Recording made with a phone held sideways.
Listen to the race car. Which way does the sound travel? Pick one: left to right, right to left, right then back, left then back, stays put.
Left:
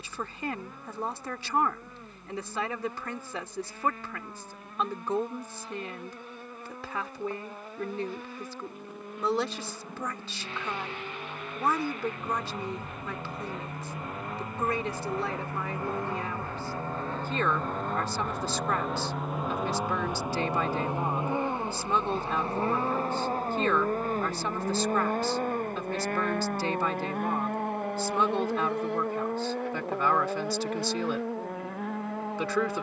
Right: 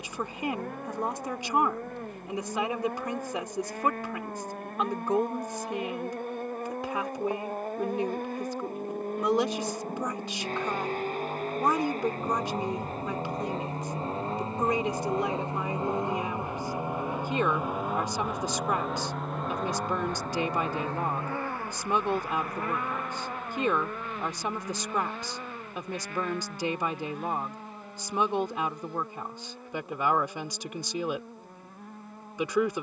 right to left.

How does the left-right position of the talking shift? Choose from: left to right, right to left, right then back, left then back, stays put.
stays put.